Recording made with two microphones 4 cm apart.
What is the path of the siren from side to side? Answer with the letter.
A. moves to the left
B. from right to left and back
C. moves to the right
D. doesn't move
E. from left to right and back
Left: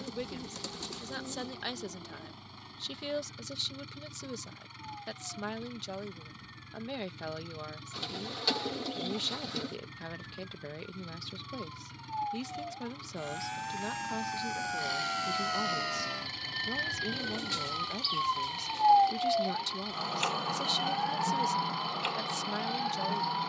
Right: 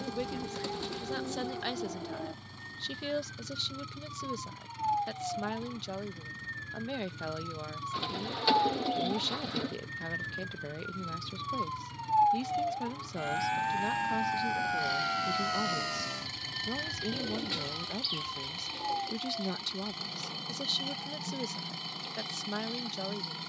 A.